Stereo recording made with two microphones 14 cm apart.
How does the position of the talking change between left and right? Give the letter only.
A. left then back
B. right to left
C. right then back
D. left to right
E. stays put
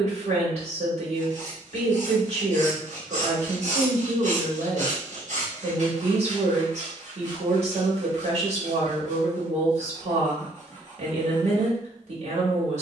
E.